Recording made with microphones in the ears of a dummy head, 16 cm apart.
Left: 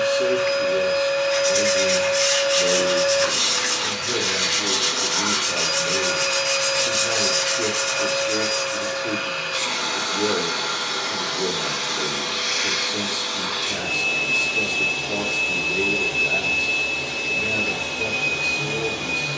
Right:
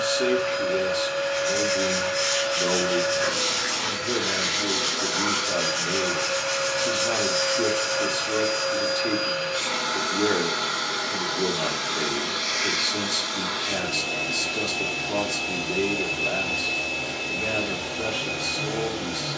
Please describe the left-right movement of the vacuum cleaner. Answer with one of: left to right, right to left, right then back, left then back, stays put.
stays put.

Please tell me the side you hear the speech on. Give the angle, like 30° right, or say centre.
50° right.